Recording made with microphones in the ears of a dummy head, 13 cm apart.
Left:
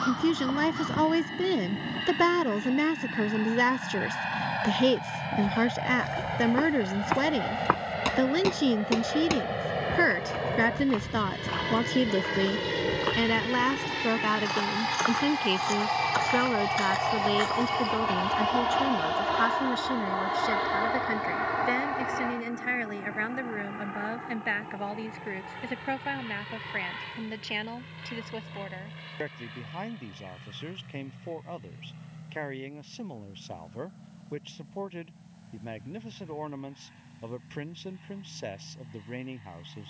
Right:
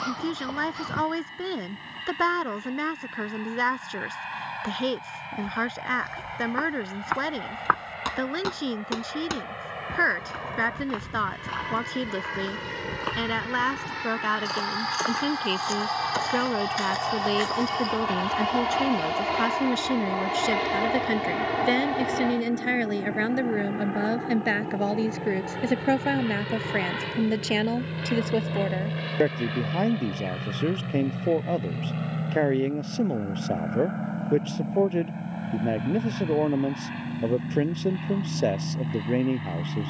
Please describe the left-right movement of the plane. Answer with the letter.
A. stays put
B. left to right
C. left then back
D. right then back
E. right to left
B.